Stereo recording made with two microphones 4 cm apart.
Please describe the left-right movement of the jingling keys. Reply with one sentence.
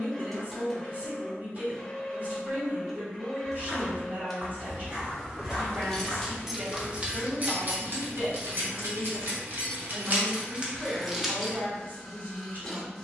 In this clip you hear the jingling keys move from left to right and back again.